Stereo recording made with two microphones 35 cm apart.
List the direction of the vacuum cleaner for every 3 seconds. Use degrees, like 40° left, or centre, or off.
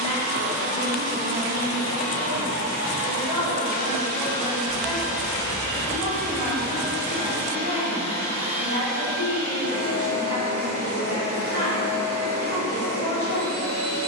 60° left, 10° left, 20° right, 40° left, 50° left.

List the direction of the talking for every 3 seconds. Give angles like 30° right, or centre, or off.
50° right, 10° right, 20° right, 50° right, 50° right.